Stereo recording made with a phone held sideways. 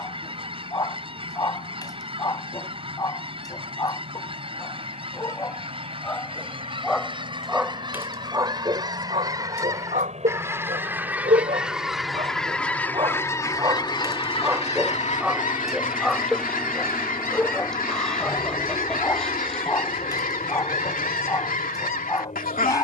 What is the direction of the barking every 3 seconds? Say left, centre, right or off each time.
left, left, centre, right, right, centre, left, left.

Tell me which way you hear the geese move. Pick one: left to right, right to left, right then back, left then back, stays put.
right to left.